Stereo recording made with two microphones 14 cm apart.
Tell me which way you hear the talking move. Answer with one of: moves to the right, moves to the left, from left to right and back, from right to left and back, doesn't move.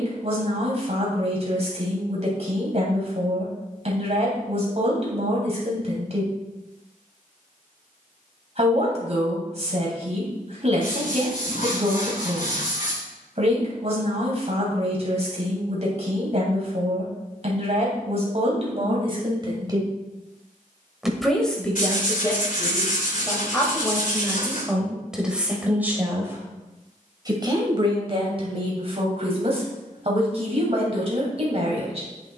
from right to left and back.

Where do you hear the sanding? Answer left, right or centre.
left.